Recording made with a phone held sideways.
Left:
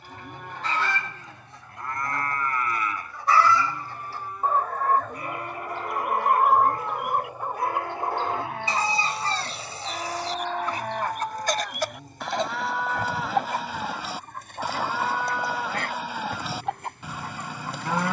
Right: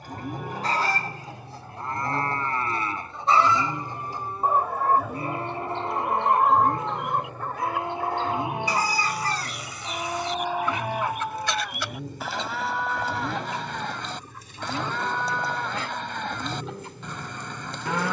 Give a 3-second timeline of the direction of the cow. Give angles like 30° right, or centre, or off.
20° right, 30° right, 20° right, 10° right, centre, 10° left.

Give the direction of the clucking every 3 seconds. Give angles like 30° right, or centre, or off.
30° right, 10° right, 10° left, 40° left, 50° left, 60° left.